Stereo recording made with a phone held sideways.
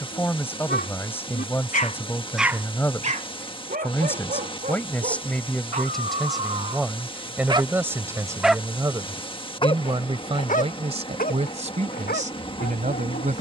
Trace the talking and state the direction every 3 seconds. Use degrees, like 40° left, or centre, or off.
10° left, 10° left, 10° right, 40° right, 50° right.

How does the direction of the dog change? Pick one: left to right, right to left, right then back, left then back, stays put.
right then back.